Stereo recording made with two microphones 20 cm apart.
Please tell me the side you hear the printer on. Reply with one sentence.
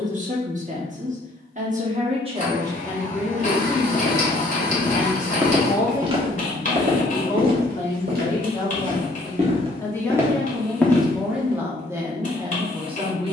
In this clip you hear the printer on the left.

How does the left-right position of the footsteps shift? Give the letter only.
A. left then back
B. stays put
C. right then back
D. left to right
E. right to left
C.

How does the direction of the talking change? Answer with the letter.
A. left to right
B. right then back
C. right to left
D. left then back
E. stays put
D.